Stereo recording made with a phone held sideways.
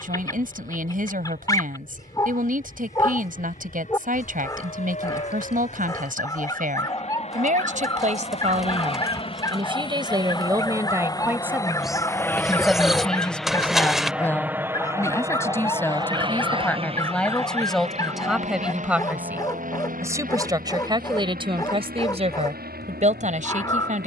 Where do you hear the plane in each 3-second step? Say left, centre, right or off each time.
left, left, left, left, centre, right, right, right.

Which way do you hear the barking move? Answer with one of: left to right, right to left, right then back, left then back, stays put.
stays put.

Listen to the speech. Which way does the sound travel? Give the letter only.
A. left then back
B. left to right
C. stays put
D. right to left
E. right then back
A.